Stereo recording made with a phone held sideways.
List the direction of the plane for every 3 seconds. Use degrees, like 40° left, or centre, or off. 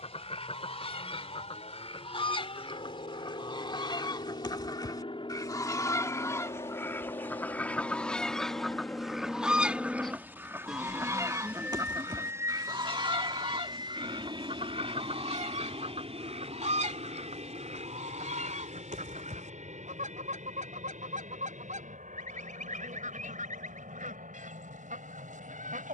60° left, 50° left, 30° left, centre, 30° right, 50° right, 60° right, 60° right, 70° right.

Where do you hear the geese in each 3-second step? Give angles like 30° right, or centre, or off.
50° left, 30° left, 10° left, 20° right, 40° right, 60° right, 70° right, 80° right, 80° right.